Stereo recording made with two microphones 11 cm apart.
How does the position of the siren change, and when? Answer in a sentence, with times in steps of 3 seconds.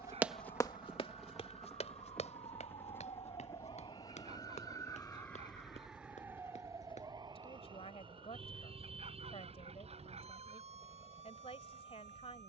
You can hear the siren on the left from 0 s and on the right from 6 s.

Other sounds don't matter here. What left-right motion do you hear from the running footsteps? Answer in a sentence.
In this clip you hear the running footsteps go from the right side to the left.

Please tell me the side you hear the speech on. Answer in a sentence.
You can hear the speech on the left.